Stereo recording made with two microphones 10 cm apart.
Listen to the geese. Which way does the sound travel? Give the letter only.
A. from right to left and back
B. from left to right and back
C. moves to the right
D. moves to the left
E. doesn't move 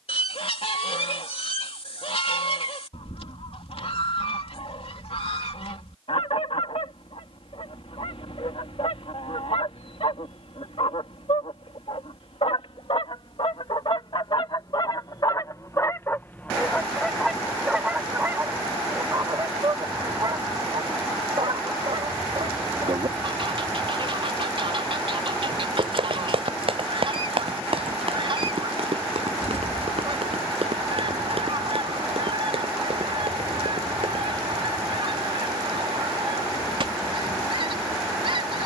C.